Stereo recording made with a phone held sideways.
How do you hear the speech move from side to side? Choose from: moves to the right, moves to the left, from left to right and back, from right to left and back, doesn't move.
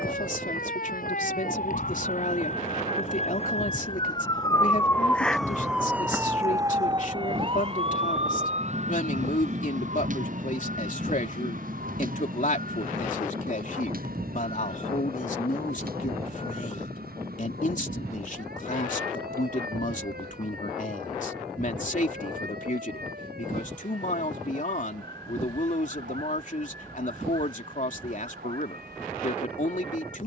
doesn't move.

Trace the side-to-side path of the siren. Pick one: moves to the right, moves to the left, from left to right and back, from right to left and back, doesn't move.
moves to the right.